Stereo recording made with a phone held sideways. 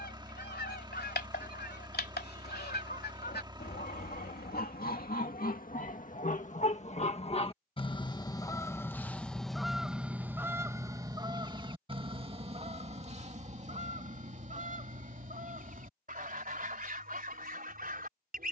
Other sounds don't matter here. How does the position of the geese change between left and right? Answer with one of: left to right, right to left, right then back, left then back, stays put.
left to right.